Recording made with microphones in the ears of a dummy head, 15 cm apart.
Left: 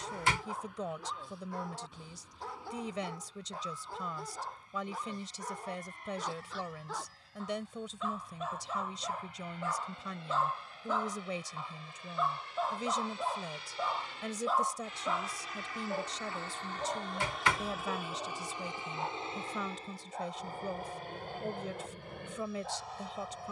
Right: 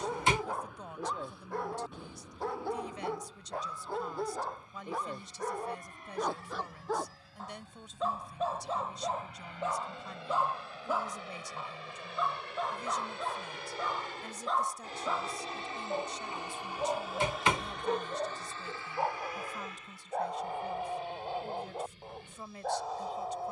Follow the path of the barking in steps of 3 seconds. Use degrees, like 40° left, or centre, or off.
50° right, 50° right, 40° right, 10° right, 10° left, 20° right, 40° right, 50° right.